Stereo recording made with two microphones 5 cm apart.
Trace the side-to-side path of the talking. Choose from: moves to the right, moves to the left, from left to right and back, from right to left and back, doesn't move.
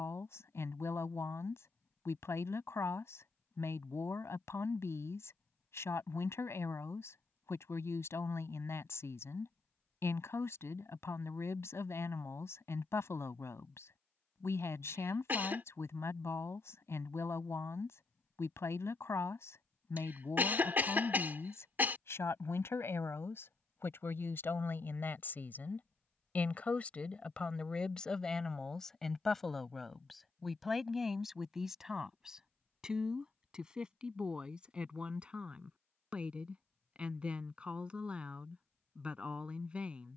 moves to the right.